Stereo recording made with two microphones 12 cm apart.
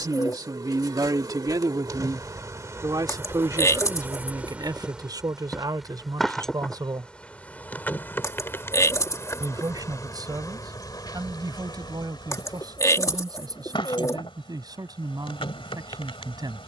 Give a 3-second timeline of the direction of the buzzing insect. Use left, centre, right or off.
right, centre, centre, left, left, left.